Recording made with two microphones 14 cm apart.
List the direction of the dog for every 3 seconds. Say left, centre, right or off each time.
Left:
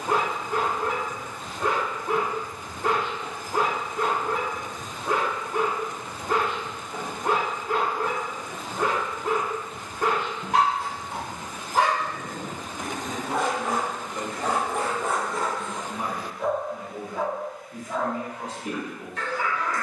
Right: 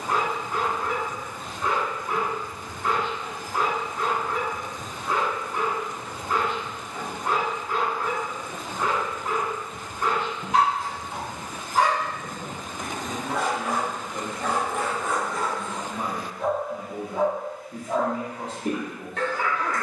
left, left, left, left, left, centre, right.